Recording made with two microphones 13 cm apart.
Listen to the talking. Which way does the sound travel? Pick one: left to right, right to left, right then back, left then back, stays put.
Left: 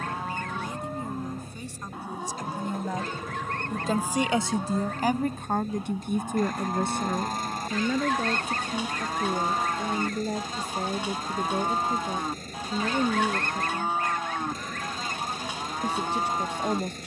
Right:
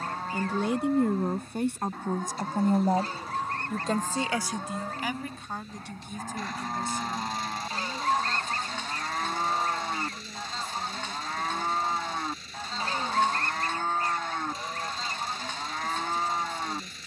right to left.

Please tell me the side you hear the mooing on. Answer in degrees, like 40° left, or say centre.
10° left.